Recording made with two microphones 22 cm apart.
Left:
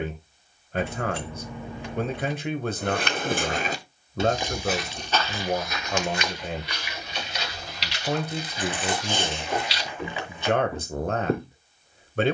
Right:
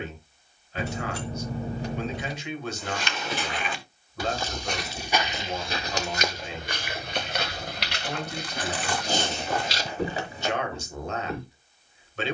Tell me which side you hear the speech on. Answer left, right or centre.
left.